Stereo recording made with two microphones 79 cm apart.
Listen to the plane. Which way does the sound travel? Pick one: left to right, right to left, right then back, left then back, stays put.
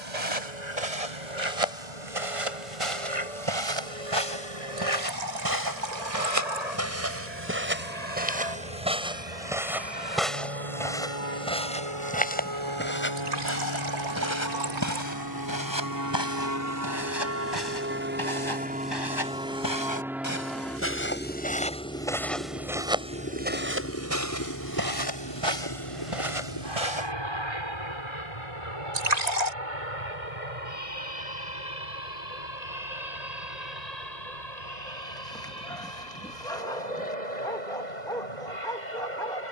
right to left.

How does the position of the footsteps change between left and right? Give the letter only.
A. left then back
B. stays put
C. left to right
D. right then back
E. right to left
A.